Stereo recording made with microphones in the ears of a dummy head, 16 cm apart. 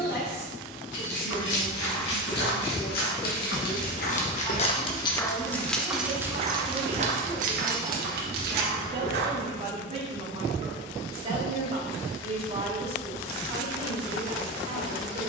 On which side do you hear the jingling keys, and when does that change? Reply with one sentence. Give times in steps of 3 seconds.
In this clip you hear the jingling keys on the left from 0 s, on the right from 6 s and not at all from 9 s.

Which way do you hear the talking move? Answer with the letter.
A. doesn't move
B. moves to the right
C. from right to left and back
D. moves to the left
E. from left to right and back
B.